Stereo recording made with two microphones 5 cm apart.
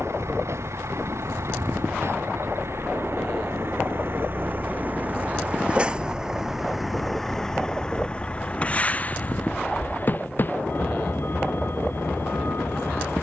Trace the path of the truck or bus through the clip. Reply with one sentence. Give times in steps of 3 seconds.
You can hear the truck or bus on the right from 0 s, in the centre from 6 s and on the left from 9 s.